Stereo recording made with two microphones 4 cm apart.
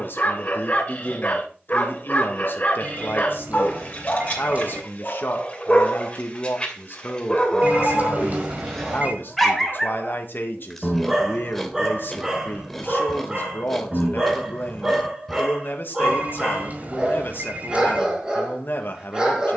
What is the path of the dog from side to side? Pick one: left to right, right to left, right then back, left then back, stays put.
left to right.